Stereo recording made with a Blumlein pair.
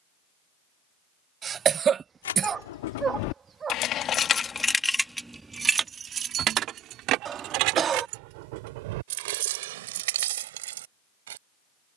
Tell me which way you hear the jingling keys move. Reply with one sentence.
In this clip you hear the jingling keys go from the left side to the right.